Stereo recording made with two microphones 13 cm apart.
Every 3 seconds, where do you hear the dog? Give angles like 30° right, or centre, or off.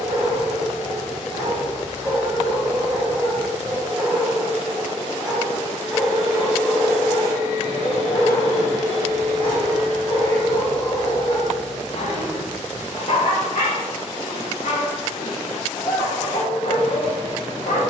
30° right, 10° right, 20° left, 50° left, 60° left, 70° left.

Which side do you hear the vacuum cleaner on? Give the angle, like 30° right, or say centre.
40° right.